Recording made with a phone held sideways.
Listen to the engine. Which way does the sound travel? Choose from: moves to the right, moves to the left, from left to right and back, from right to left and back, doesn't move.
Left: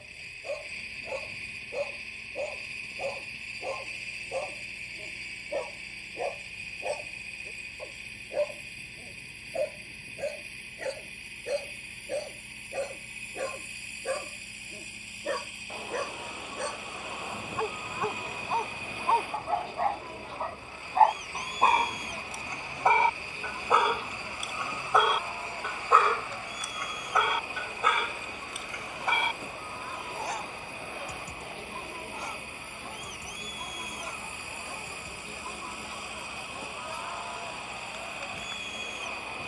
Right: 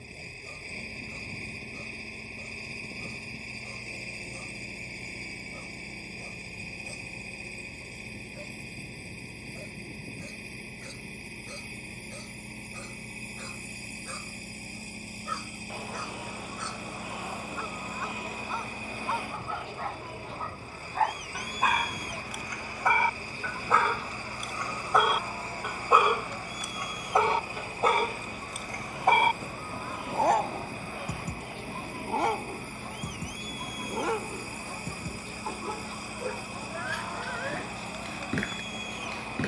doesn't move.